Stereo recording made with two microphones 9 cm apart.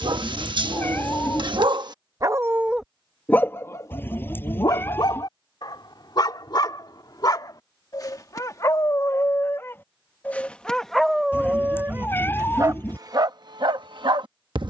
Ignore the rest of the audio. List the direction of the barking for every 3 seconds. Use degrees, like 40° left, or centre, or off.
50° right, 40° left, 40° left, 10° left, 50° right.